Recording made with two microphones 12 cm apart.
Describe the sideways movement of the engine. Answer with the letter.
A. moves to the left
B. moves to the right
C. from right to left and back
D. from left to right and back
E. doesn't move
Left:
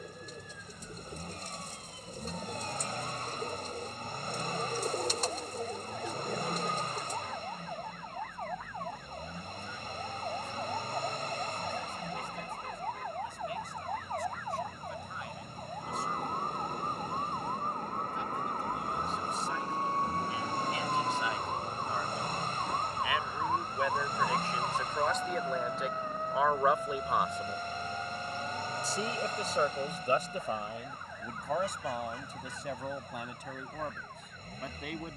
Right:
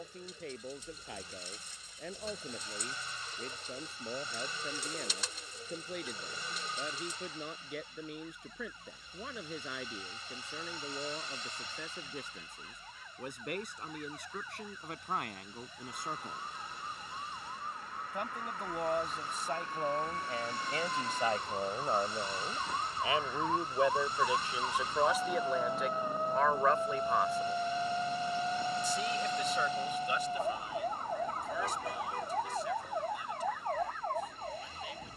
E.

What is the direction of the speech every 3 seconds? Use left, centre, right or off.
right, right, right, right, right, right, right, right, centre, left, left, left.